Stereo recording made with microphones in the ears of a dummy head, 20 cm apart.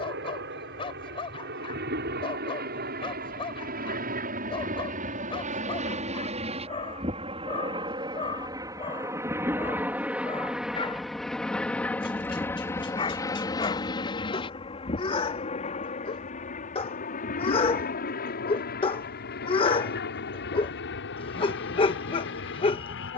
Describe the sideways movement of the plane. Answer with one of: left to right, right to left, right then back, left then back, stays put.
right to left.